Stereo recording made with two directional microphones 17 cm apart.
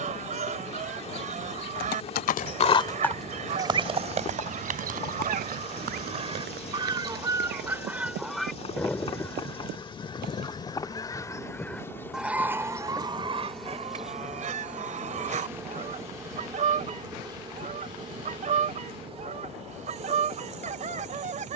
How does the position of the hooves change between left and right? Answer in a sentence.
In this clip you hear the hooves go from the left side to the right.